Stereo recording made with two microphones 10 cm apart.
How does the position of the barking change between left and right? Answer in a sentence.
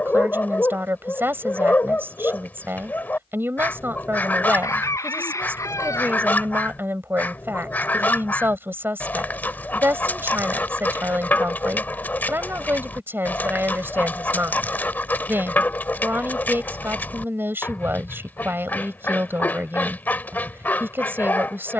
In this clip you hear the barking stay in one place.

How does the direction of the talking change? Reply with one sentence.
You can hear the talking stay in one place.